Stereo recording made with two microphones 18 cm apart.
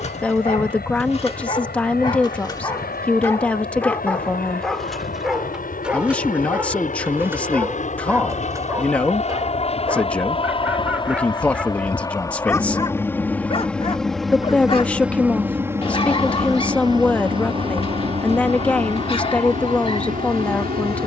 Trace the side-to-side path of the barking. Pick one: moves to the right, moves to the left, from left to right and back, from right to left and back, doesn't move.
from left to right and back.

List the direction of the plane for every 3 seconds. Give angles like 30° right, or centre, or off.
60° left, 60° left, 50° left, 30° left, 10° left, 20° right, 40° right.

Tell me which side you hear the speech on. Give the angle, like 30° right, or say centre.
10° left.